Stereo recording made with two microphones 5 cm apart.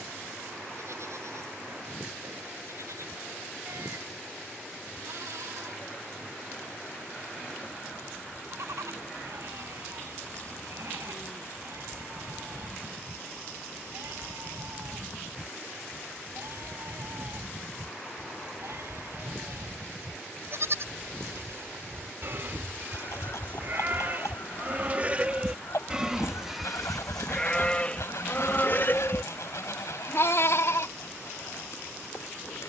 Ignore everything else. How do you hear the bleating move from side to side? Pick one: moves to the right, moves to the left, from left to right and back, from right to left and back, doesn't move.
moves to the left.